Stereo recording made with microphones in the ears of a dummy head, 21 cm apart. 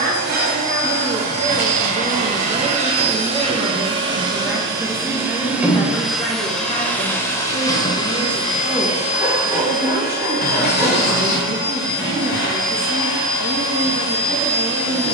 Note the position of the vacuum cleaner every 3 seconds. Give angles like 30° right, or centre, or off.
40° right, 20° right, 10° left, 40° left, 60° left.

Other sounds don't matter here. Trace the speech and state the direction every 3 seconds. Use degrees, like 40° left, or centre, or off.
30° right, centre, 10° left, 40° right, 40° right.